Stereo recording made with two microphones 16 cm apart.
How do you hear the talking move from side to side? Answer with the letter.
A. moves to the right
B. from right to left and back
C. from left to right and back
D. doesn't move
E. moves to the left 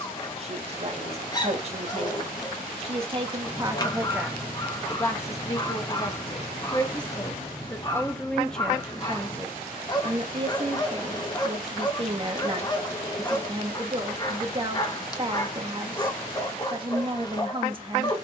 B.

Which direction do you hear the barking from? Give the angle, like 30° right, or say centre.
30° left.